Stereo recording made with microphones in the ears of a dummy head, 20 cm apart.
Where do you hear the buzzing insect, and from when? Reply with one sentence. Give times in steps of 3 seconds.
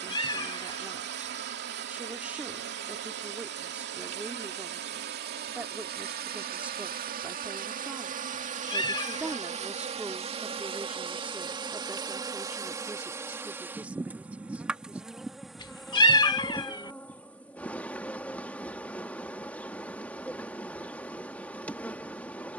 In this clip you hear the buzzing insect on the right from 0 s and in the centre from 12 s.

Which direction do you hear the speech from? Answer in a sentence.
In this clip you hear the speech in the centre.